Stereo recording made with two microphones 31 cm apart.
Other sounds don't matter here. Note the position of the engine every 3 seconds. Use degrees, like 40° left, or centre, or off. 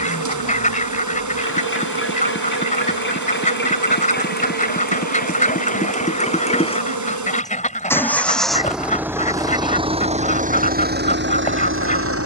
40° left, 30° left, 10° left, 30° right.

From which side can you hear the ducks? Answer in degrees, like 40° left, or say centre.
30° left.